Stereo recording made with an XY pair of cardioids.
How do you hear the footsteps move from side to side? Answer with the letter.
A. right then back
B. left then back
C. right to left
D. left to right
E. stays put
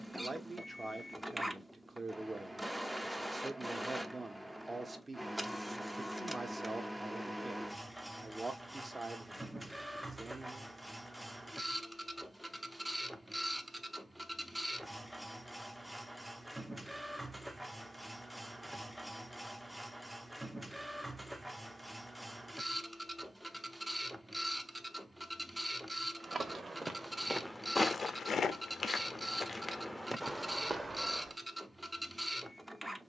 B.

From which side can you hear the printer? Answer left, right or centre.
centre.